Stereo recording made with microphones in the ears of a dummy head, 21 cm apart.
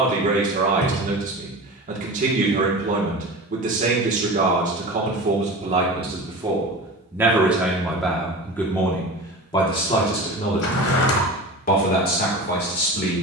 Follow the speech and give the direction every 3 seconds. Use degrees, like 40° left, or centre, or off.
30° right, 30° right, centre, 30° left, 40° left.